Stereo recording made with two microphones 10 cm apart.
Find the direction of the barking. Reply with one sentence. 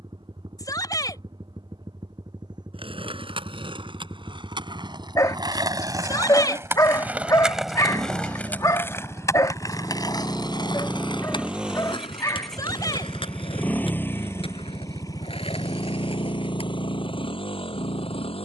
In this clip you hear the barking on the left.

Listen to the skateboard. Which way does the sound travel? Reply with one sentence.
In this clip you hear the skateboard move from right to left.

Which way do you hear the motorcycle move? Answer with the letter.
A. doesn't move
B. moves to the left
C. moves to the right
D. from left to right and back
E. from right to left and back
B.